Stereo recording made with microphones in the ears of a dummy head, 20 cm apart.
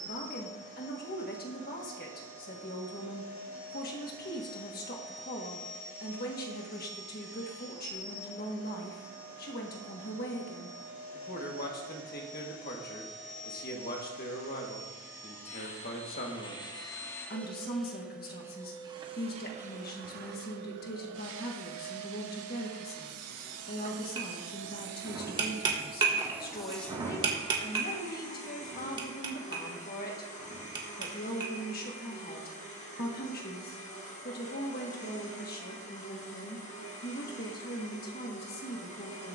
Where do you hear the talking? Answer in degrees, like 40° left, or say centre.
40° left.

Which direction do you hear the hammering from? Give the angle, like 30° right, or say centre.
20° right.